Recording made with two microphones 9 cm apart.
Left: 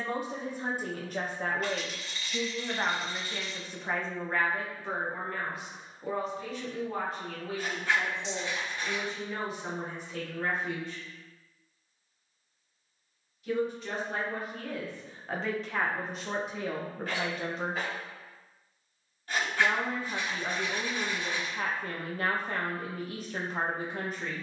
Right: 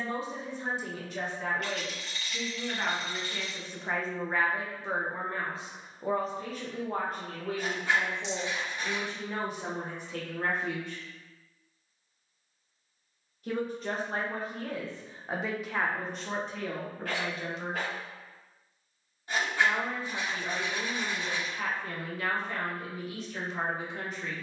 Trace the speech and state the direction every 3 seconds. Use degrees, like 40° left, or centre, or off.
40° left, 10° right, 50° right, 60° right, 40° right, 10° left, 50° left, 50° left.